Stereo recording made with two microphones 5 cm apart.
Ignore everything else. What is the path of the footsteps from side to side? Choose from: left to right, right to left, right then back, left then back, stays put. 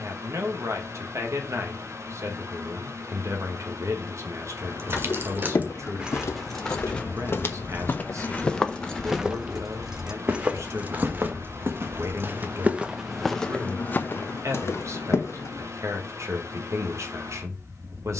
right then back.